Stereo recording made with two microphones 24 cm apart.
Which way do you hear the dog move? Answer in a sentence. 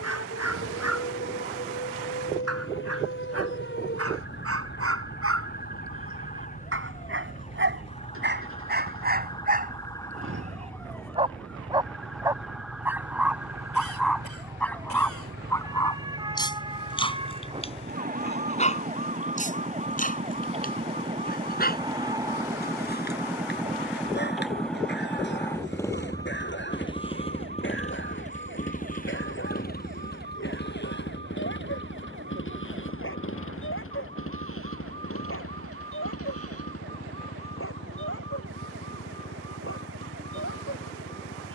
You can hear the dog go from the right side to the left.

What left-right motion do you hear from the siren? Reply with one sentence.
You can hear the siren go from the left side to the right.